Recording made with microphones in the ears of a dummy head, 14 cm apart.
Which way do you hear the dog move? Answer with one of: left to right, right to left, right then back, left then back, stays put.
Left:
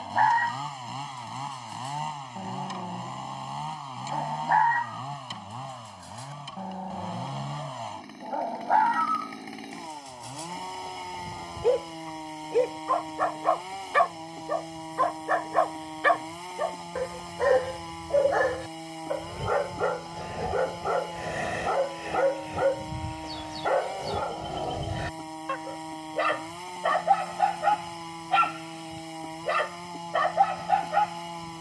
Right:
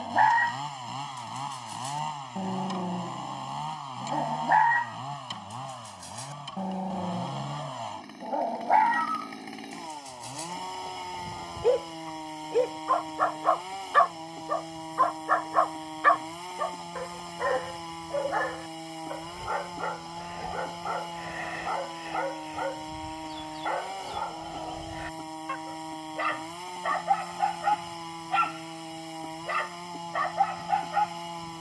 right to left.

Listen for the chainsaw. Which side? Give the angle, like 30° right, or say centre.
centre.